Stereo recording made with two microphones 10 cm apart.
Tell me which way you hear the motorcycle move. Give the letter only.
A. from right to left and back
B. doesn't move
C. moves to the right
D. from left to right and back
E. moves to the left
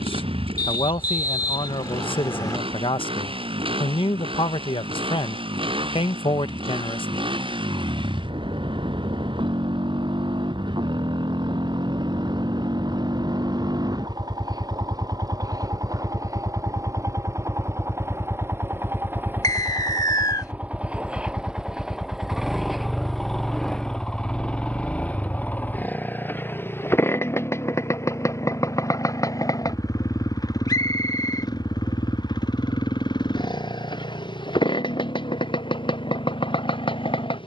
E.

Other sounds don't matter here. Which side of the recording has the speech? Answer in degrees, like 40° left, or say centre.
60° left.